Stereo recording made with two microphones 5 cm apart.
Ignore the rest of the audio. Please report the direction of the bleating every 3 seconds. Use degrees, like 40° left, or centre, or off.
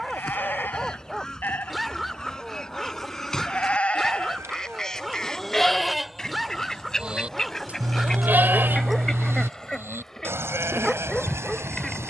50° left, 20° left, 30° right, 70° right.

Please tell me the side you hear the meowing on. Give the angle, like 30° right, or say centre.
70° right.